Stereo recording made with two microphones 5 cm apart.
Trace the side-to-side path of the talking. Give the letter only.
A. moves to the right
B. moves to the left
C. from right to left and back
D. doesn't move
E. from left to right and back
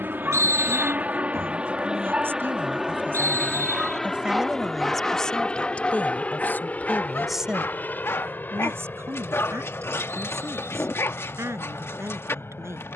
C.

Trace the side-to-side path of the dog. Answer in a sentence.
You can hear the dog go from the right side to the left.